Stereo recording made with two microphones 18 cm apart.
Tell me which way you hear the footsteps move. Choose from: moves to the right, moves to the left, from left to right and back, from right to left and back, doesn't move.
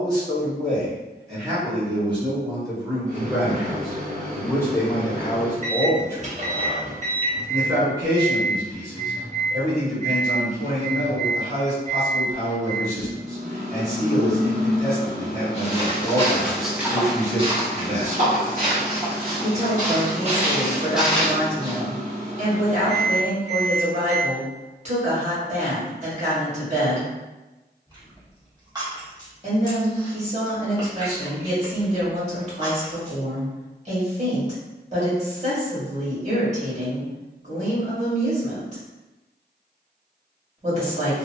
from left to right and back.